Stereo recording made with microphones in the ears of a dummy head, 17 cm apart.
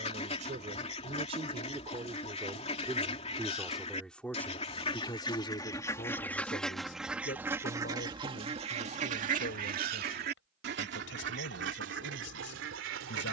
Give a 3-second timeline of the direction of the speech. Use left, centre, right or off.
right, centre, left, left, left.